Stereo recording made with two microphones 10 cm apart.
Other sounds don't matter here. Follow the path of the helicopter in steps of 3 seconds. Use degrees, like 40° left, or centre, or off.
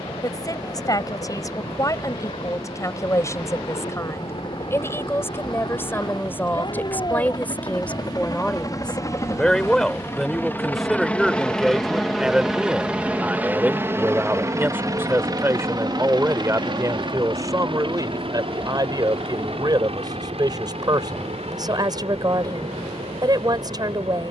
60° left, 60° left, 40° left, 20° left, 20° right, 50° right, 60° right, 70° right.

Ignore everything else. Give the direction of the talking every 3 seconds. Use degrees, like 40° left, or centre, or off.
30° left, 30° left, 20° left, centre, 10° right, 30° right, 40° right, 40° right.